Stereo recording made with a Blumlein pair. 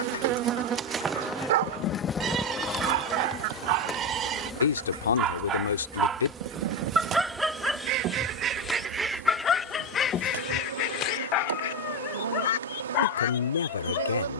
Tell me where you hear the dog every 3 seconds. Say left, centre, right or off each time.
right, right, centre, left, left.